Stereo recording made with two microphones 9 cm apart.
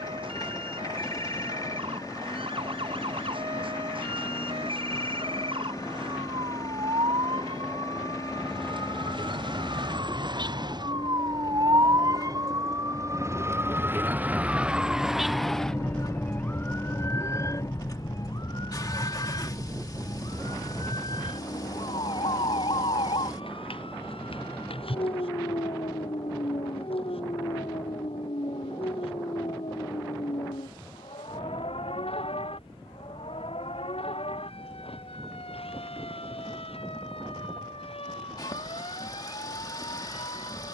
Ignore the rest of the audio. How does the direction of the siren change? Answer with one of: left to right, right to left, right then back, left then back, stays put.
right to left.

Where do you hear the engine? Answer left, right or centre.
left.